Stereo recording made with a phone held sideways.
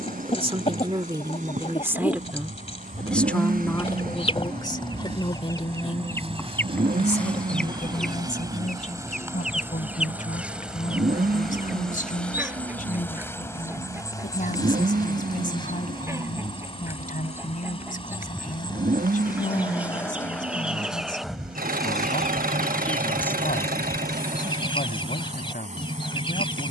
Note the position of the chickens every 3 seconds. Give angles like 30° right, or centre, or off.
40° left, 30° left, 10° left, 10° right, 10° right, 20° right, 10° right, 10° left, 30° left.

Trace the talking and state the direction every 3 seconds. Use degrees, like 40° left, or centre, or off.
20° right, 20° left, 50° left, 60° left, 60° left, 60° left, 60° left, 60° left, 60° left.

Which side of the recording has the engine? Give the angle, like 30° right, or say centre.
70° right.